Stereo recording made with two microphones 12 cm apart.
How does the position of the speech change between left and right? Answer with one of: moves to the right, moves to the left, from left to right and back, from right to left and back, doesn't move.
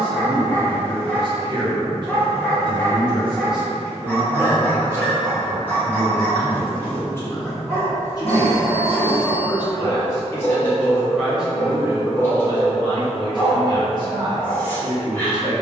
from right to left and back.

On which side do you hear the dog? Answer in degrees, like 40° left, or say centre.
10° left.